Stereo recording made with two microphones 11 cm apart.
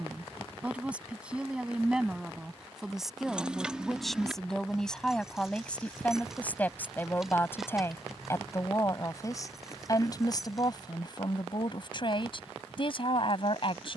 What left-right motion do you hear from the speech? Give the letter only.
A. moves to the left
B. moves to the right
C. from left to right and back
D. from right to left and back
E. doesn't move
A.